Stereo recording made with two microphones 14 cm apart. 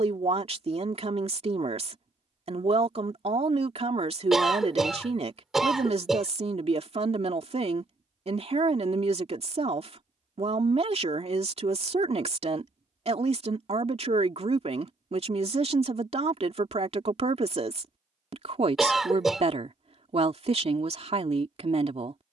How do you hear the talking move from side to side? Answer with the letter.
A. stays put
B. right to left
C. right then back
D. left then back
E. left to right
A.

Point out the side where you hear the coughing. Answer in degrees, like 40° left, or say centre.
centre.